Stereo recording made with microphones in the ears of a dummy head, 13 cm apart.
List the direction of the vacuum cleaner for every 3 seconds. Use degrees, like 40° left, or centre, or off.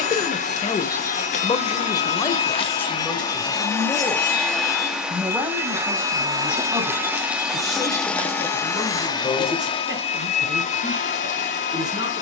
50° left, centre, centre, 40° left.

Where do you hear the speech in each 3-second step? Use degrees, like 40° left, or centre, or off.
30° left, centre, 20° right, 30° right.